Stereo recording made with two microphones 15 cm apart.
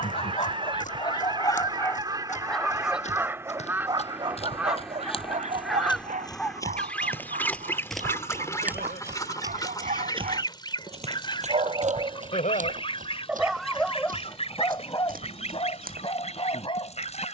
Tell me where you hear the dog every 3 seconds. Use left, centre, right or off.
left, right, right, right, centre, left.